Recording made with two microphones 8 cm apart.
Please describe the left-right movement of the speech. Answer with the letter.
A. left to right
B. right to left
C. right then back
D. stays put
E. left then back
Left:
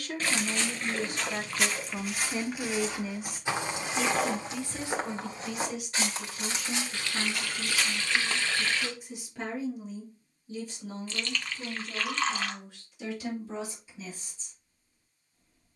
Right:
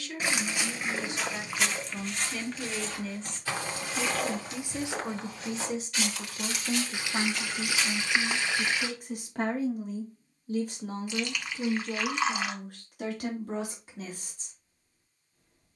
A.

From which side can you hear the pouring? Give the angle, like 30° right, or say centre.
10° right.